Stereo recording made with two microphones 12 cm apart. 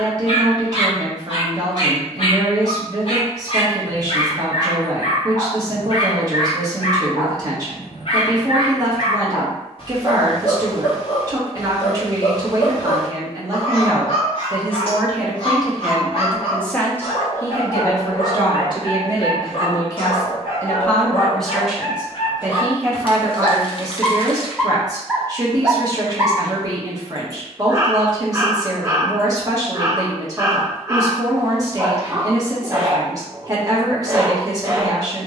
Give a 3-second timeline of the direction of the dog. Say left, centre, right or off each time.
left, left, left, left, left, left, left, left, centre, right, right, right.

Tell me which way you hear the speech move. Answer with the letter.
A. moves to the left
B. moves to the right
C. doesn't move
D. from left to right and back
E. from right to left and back
E.